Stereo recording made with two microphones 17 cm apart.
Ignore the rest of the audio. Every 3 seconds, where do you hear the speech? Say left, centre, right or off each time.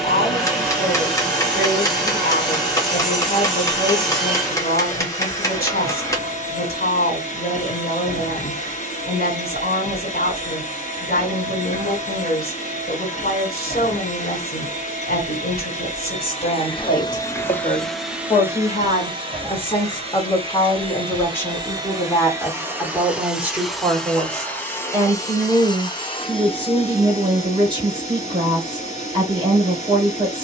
left, left, left, left, left, left, left, centre, right, right.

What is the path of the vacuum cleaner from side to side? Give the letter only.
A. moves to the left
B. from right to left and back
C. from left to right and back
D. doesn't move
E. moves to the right
C.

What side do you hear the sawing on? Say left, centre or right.
centre.